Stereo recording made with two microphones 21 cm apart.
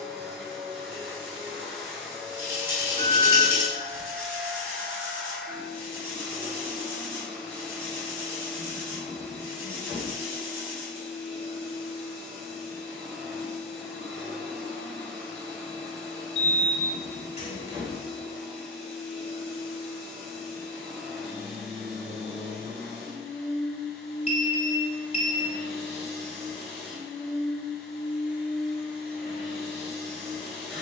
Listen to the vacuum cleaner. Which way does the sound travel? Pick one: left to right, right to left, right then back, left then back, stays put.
stays put.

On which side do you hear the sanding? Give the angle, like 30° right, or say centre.
10° right.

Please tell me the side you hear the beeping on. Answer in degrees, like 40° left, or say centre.
30° left.